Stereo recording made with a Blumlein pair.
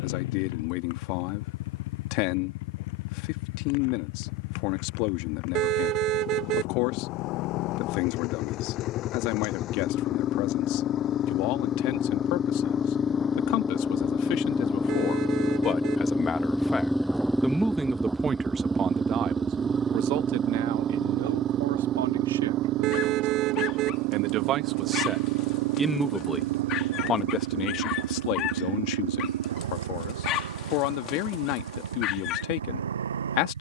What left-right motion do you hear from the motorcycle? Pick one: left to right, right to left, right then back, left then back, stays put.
left to right.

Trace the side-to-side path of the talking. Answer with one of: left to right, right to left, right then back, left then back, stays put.
right then back.